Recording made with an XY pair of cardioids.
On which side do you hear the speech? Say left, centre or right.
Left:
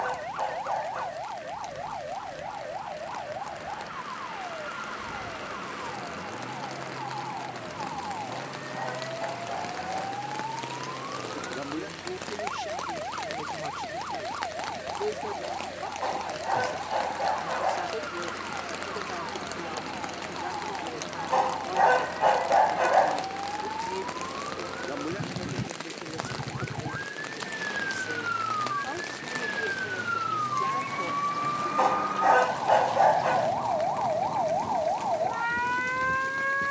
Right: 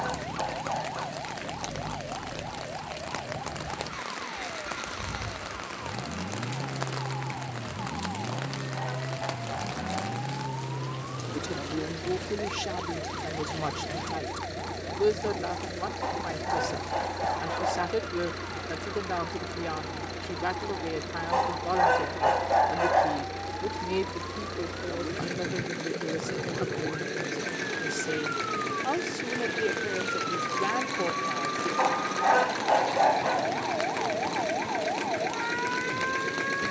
right.